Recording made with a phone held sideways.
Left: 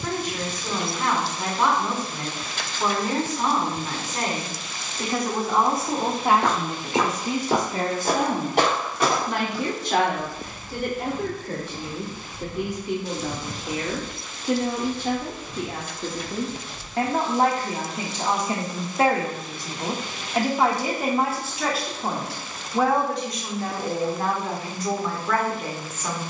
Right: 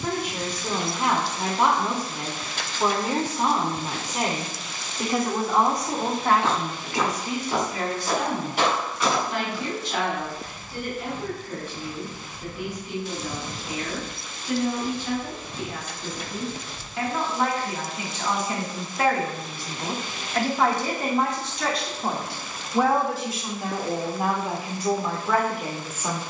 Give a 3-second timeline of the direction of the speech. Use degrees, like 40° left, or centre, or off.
20° right, 10° right, 30° left, 70° left, 70° left, 50° left, 20° left, centre, 10° right.